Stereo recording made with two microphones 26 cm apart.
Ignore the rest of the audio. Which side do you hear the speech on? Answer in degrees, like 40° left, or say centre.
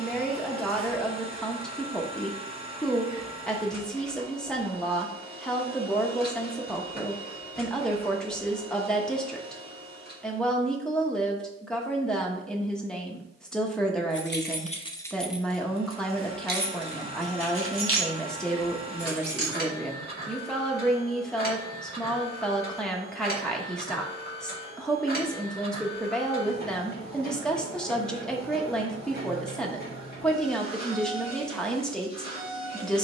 centre.